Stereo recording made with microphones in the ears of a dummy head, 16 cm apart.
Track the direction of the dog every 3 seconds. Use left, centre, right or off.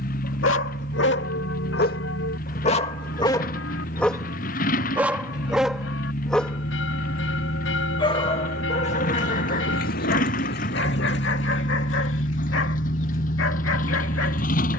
left, centre, left, left, left.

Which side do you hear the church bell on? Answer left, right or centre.
left.